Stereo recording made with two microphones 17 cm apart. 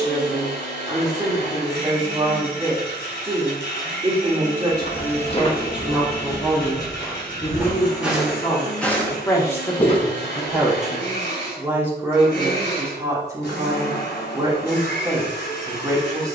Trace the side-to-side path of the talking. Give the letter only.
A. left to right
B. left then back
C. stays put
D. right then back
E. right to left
B.